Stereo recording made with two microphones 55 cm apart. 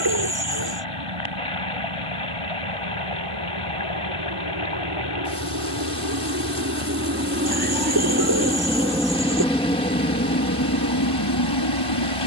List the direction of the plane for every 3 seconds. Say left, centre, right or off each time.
right, right, right, left.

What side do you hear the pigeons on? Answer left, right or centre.
right.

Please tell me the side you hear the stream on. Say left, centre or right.
left.